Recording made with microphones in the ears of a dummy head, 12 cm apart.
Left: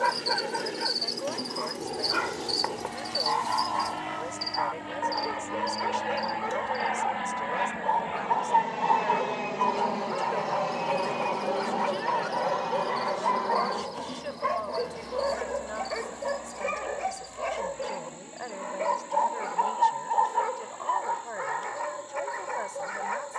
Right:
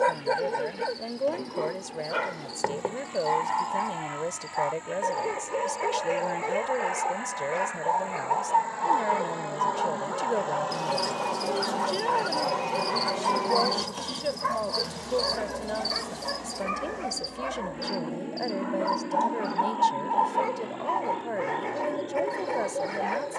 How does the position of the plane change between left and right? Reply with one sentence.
In this clip you hear the plane travel towards the right.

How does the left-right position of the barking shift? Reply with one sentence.
In this clip you hear the barking move from right to left and back again.